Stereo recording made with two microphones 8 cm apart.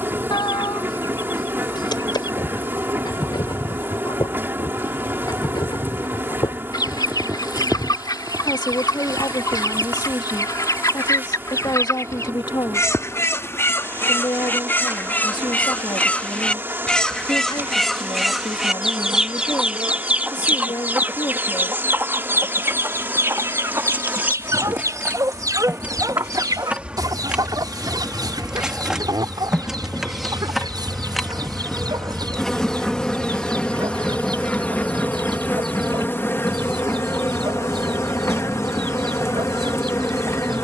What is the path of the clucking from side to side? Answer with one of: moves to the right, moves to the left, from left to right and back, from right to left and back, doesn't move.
moves to the right.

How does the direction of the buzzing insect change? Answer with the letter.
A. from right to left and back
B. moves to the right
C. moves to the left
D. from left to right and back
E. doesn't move
C.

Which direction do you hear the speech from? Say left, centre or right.
left.